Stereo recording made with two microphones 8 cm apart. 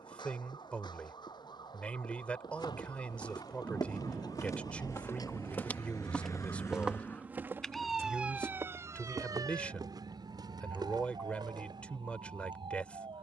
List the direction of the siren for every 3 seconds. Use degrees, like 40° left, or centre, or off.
70° left, 60° left, 10° left, 60° right, 80° right.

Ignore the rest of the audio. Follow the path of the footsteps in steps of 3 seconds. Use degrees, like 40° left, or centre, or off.
70° left, 40° left, 20° right, 60° right, off.